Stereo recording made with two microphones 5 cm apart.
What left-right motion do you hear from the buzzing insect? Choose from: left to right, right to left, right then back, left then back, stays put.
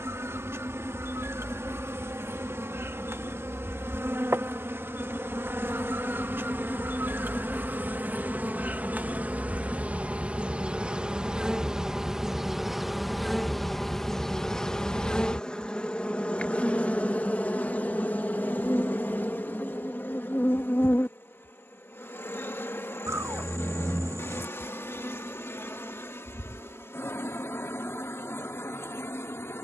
right to left.